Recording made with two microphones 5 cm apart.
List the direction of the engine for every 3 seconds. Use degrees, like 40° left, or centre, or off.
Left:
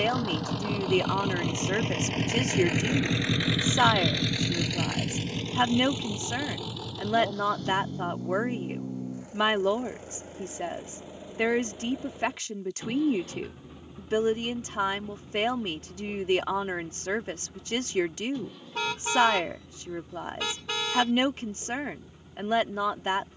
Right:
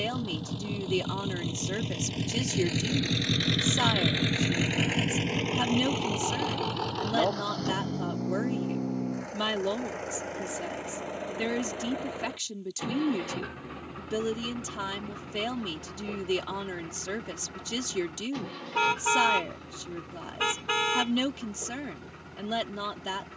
60° left, 20° right, 60° right, 70° right, 80° right, 80° right, 80° right, 80° right.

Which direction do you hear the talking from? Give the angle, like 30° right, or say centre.
40° left.